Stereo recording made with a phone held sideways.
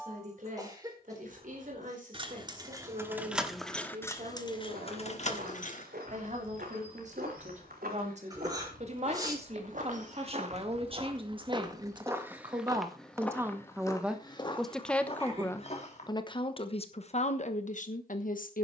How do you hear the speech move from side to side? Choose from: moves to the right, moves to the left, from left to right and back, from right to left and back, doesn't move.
moves to the left.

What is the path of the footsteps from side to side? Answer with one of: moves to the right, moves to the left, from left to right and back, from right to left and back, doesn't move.
moves to the left.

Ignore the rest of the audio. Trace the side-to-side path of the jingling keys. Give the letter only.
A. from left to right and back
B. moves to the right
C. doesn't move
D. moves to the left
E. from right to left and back
E.